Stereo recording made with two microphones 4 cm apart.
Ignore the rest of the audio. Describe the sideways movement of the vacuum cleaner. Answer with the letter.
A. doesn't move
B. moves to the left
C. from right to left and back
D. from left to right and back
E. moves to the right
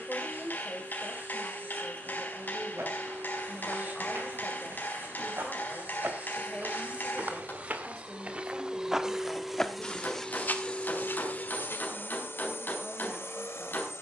B.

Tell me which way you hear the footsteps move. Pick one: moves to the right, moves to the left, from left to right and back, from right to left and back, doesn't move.
moves to the left.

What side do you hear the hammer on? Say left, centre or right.
left.